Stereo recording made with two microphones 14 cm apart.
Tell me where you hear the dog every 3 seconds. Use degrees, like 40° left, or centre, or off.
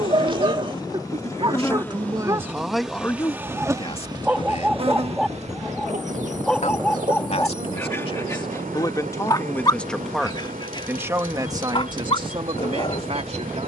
30° right, 10° right, 10° left, 30° left, 40° left.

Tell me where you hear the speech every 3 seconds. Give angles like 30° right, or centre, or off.
30° right, 40° left, 40° left, 10° right, 40° right.